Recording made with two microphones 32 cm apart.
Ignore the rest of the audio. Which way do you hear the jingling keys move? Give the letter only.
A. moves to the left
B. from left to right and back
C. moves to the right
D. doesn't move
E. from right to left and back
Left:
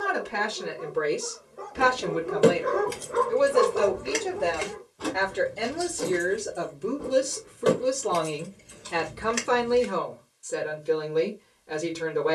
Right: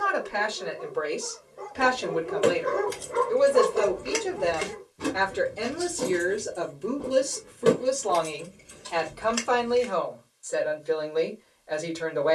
B.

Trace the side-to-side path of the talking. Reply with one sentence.
In this clip you hear the talking go right and come back.